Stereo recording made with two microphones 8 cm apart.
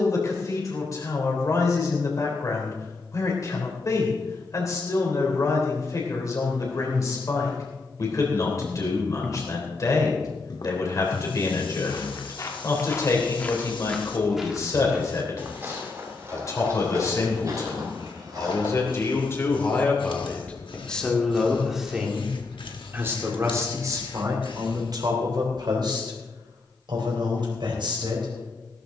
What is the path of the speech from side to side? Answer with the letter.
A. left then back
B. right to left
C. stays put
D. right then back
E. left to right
E.